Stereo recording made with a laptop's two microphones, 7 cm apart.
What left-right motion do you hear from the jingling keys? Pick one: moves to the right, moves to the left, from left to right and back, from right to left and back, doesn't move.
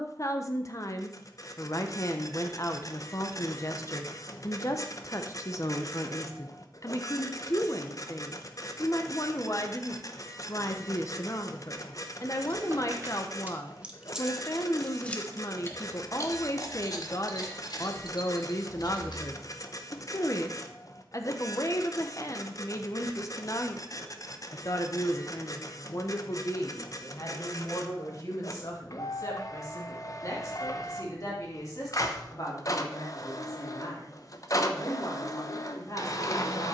moves to the left.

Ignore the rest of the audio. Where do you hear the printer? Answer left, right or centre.
left.